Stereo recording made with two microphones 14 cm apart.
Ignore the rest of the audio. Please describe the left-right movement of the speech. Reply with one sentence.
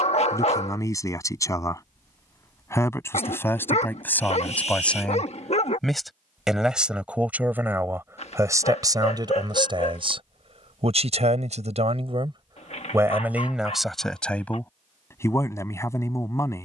In this clip you hear the speech move from left to right and back again.